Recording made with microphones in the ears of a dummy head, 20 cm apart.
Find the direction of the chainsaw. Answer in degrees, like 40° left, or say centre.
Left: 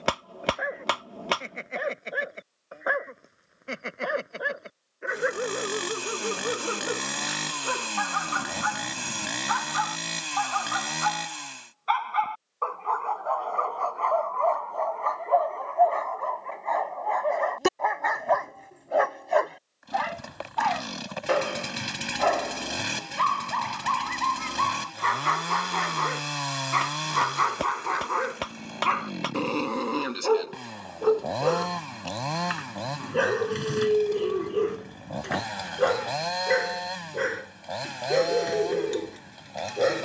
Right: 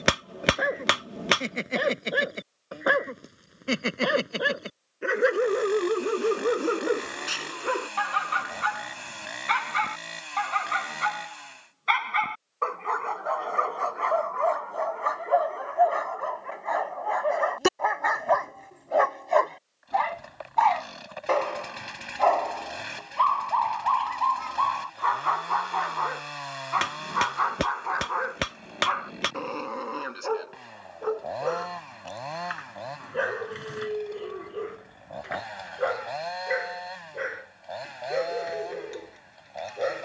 60° left.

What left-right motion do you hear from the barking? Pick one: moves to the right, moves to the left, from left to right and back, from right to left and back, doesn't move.
moves to the left.